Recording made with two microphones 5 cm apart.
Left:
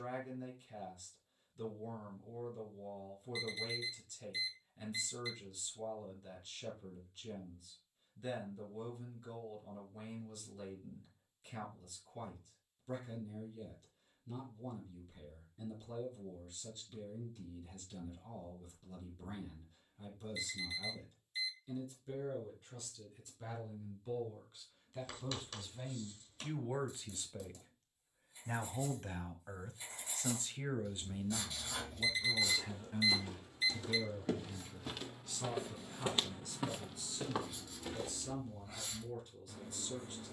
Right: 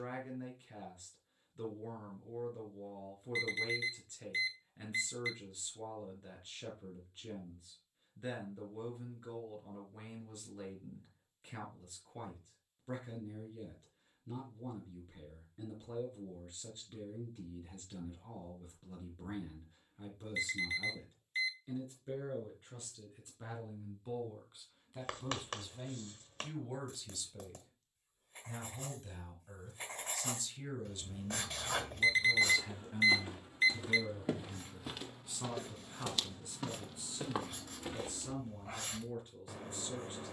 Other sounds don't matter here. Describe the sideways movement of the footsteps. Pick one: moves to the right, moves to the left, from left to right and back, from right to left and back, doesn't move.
from right to left and back.